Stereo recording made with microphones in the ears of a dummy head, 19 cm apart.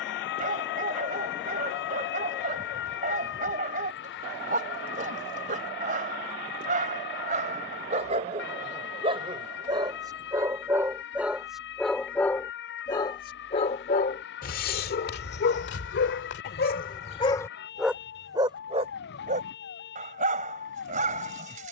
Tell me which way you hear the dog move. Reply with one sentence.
In this clip you hear the dog go left and come back.